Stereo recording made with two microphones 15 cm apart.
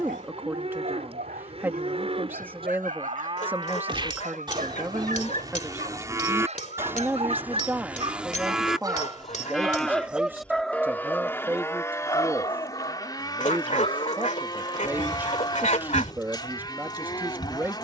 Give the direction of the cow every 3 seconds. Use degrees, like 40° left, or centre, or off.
40° right, 30° right, 10° right, 10° left, 30° left, 30° left.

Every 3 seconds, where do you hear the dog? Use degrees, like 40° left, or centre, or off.
70° right, 60° right, 40° right, centre, 40° left, 60° left.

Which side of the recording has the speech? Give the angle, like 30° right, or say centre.
10° right.